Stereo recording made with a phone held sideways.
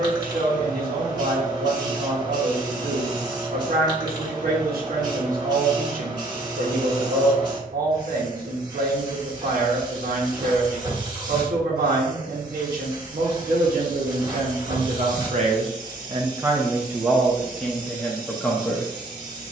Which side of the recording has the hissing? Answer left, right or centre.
right.